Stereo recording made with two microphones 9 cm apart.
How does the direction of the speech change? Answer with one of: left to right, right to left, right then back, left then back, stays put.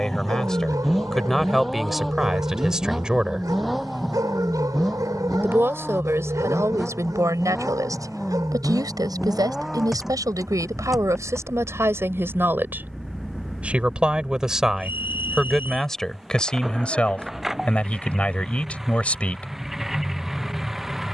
right then back.